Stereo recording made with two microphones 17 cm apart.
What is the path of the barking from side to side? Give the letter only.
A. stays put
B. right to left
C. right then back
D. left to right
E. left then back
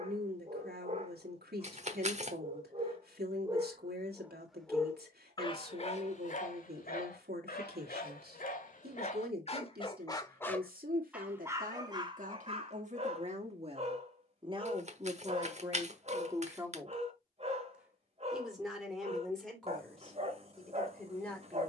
E.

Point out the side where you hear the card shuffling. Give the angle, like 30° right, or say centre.
40° right.